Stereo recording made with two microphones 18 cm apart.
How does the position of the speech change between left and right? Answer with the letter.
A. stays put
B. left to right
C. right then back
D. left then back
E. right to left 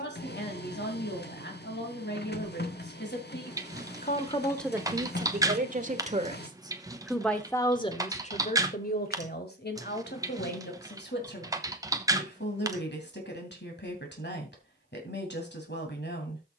C.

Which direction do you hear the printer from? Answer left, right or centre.
left.